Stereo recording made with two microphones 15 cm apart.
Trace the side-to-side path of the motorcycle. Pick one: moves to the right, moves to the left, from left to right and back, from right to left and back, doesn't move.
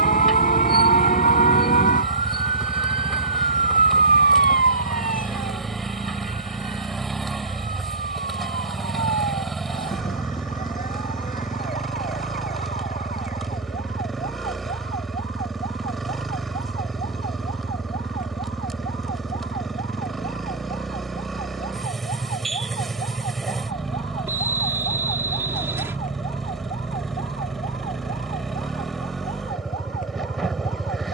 doesn't move.